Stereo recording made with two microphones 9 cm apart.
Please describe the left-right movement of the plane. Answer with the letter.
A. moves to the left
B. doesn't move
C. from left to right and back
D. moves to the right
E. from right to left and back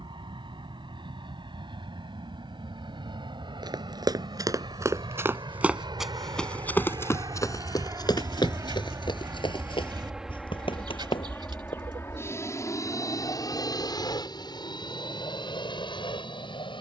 A.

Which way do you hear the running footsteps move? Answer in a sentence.
In this clip you hear the running footsteps move to the left.